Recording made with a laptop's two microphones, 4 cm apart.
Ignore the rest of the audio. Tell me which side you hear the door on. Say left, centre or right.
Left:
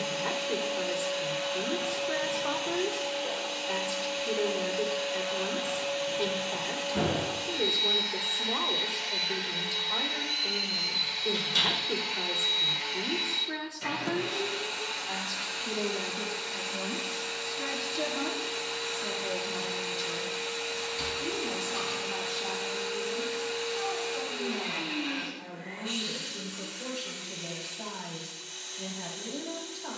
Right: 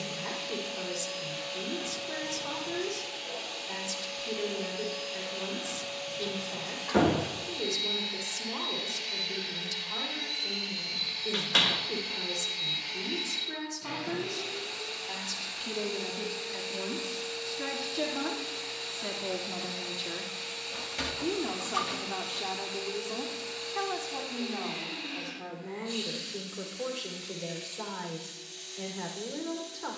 right.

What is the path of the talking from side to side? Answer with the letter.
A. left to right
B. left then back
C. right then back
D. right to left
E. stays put
A.